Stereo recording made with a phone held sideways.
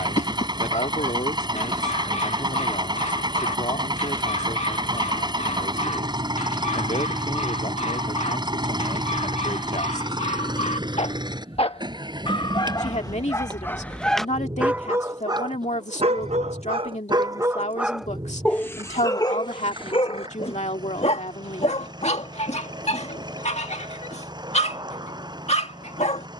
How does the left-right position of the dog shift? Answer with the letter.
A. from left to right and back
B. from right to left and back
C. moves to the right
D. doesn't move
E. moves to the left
A.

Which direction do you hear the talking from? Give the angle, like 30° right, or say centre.
50° left.